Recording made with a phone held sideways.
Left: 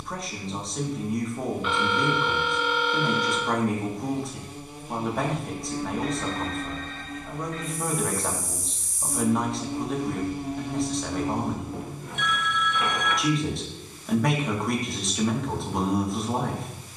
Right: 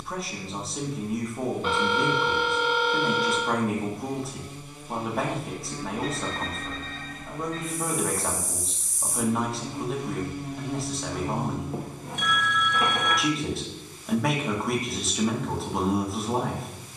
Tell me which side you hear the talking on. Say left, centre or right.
centre.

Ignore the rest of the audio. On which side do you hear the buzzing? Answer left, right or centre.
left.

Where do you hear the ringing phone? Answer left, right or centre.
right.